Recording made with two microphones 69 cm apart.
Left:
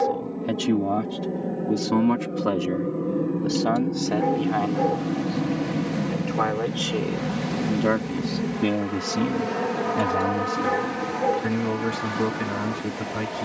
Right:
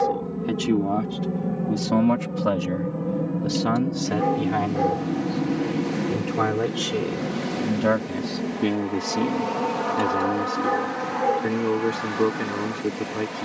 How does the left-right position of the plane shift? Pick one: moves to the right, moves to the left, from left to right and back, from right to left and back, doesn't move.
moves to the left.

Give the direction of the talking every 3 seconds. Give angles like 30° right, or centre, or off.
10° right, 40° right, 30° right, 20° left, 20° left.